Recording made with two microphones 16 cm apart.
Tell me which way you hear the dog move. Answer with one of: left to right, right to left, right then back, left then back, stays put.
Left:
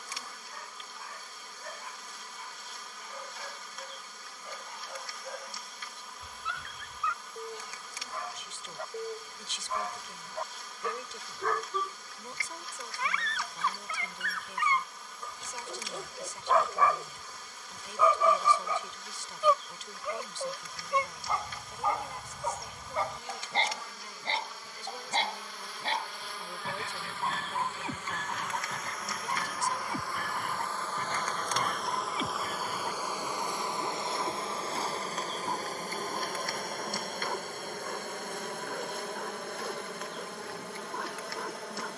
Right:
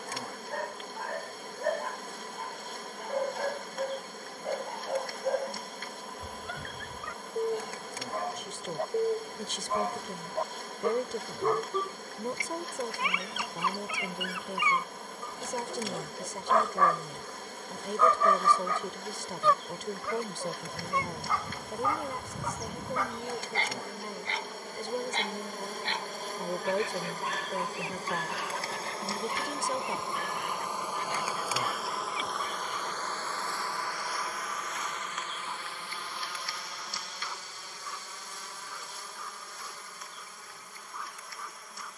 right to left.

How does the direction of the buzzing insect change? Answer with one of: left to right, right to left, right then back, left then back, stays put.
right to left.